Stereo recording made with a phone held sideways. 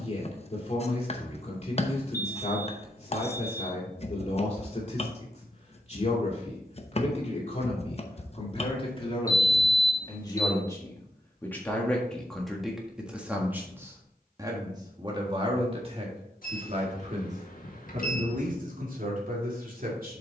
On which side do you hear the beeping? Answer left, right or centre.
left.